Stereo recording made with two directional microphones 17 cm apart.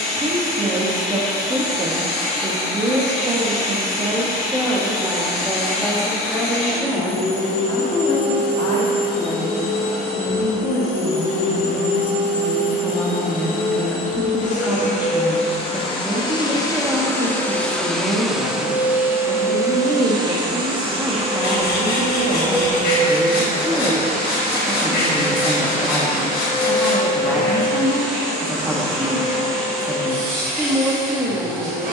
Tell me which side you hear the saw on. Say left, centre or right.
left.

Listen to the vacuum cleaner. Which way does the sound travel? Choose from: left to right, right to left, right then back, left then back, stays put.
left to right.